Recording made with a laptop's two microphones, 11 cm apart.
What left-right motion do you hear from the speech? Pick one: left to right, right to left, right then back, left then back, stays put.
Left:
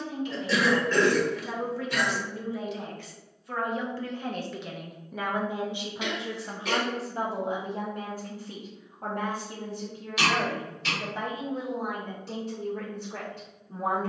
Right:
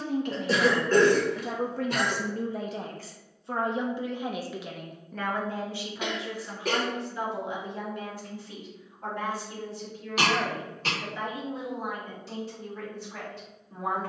right to left.